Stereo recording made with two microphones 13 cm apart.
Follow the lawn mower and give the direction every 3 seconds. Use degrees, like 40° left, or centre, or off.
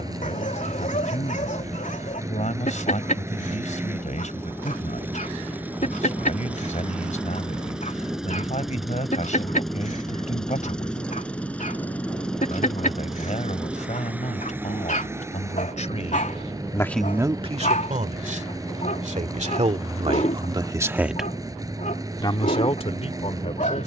20° right, 20° right, 10° right, 10° left, 10° right, 20° right, 30° right, 30° right.